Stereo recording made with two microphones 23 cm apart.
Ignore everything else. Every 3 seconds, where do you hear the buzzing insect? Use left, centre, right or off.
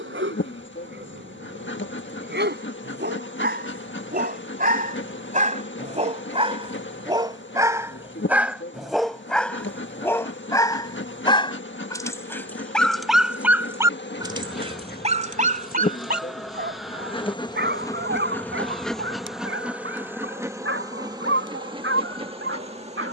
left, left, left, left, left, left, centre, right.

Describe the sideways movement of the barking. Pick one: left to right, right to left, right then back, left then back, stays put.
left then back.